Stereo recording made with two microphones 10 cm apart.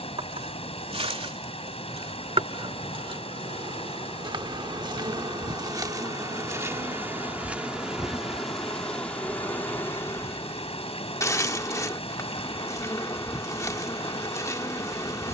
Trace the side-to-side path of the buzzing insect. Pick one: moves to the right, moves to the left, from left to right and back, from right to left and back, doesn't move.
moves to the left.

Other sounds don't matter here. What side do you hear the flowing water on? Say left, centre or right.
left.